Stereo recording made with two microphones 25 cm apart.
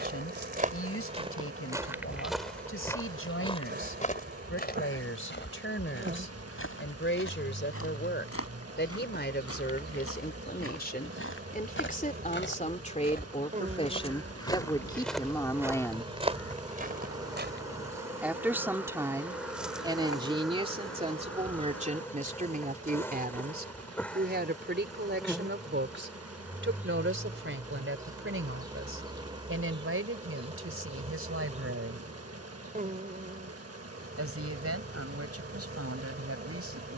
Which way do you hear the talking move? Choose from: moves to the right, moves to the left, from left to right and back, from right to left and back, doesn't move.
moves to the right.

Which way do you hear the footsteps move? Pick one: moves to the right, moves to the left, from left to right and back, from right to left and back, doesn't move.
from right to left and back.